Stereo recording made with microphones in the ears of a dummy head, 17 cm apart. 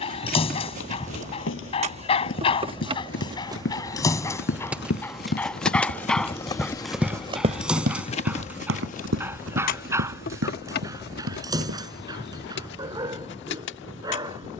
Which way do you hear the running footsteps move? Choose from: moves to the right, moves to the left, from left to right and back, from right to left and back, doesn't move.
moves to the right.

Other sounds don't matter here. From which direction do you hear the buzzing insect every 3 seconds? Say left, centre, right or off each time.
right, centre, left, left, left.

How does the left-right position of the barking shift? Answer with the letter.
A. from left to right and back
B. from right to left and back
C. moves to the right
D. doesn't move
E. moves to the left
C.